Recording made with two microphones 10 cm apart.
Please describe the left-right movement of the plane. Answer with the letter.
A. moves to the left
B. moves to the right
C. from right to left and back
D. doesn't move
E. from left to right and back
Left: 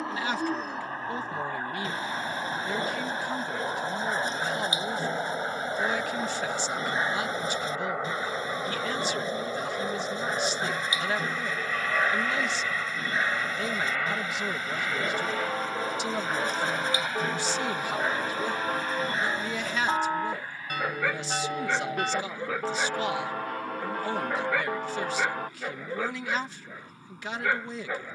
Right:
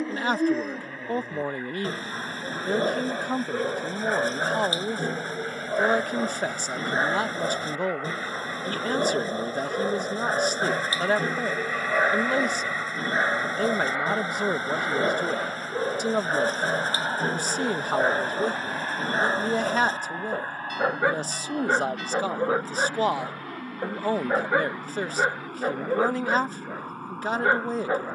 B.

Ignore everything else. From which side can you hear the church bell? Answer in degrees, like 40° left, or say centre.
50° left.